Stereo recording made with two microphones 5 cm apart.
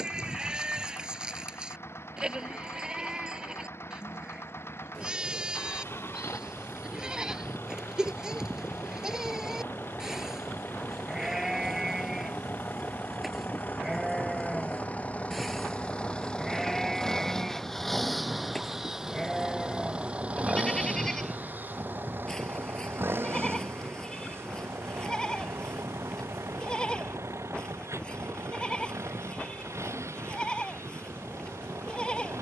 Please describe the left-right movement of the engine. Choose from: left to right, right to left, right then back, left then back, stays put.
left to right.